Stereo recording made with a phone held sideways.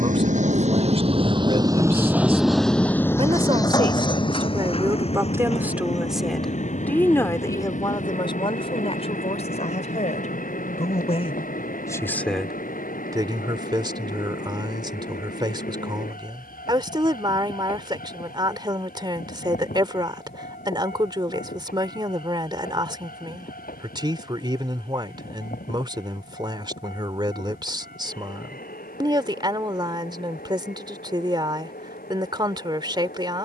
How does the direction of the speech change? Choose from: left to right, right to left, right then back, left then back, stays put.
left then back.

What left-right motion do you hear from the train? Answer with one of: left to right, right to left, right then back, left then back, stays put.
right to left.